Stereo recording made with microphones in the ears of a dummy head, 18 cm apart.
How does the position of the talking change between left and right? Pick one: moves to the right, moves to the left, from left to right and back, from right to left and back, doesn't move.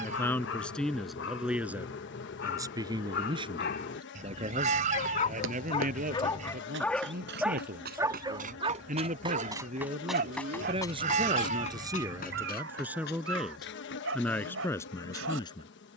from left to right and back.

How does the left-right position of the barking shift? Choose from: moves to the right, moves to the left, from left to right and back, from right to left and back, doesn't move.
moves to the right.